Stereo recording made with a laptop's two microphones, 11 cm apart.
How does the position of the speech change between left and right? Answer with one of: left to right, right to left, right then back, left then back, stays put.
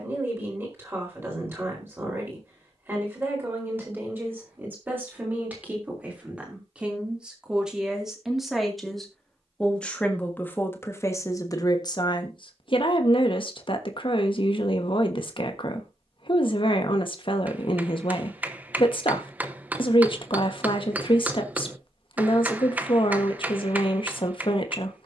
right to left.